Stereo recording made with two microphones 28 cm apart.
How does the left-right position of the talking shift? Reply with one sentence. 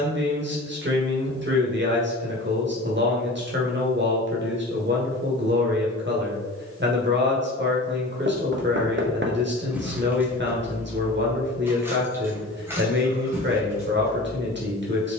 In this clip you hear the talking stay in one place.